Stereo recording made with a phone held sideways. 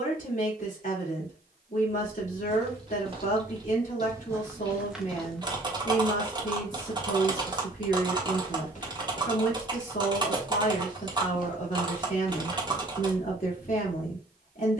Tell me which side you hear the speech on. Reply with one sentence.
In this clip you hear the speech on the left.